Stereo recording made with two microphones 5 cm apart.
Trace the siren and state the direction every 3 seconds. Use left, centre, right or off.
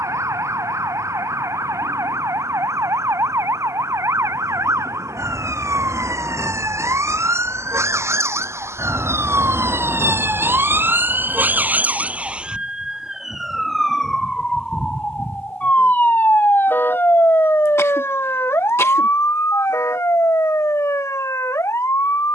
right, right, right, right, centre, left, left, left.